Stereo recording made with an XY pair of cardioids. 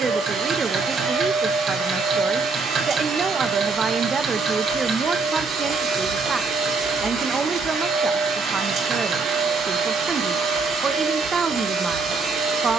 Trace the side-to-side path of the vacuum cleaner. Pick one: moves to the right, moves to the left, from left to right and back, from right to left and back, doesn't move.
doesn't move.